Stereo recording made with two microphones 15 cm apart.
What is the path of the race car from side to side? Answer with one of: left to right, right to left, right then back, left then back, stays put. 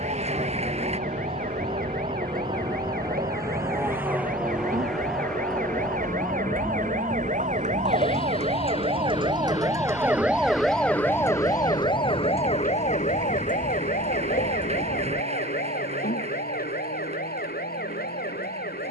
right to left.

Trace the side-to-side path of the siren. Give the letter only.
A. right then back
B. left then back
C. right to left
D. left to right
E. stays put
C.